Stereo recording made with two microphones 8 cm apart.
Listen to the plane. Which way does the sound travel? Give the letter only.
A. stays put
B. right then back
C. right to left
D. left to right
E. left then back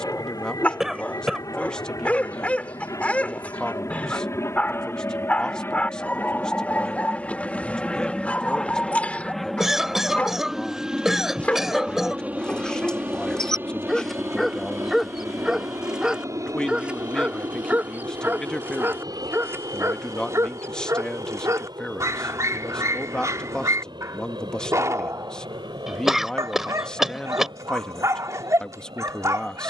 D.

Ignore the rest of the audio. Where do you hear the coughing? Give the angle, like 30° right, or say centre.
centre.